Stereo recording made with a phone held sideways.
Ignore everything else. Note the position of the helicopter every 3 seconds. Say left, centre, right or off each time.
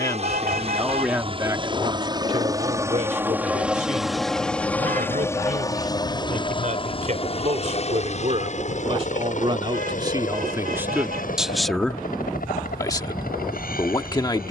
right, centre, left, left, left.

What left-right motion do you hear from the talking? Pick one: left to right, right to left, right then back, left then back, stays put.
right then back.